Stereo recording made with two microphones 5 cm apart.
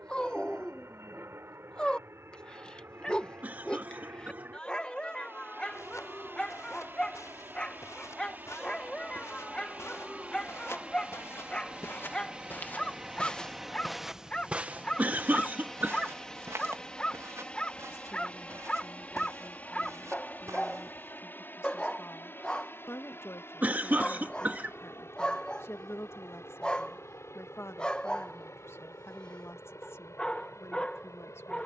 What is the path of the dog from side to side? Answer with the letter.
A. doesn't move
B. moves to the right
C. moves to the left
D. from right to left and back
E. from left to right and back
A.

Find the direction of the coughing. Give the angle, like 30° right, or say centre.
30° right.